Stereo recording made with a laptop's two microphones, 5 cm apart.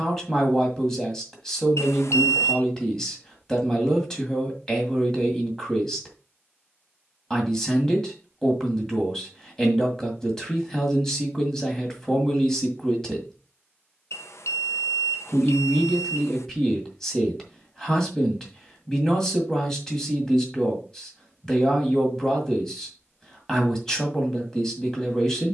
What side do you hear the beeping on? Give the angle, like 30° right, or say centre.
80° left.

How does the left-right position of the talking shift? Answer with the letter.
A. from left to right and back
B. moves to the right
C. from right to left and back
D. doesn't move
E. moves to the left
D.